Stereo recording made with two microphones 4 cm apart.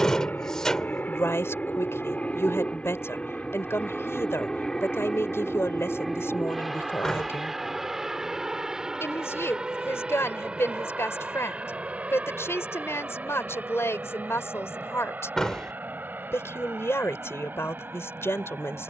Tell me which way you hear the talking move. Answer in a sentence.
In this clip you hear the talking stay put.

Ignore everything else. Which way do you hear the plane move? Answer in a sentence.
You can hear the plane go from the left side to the right.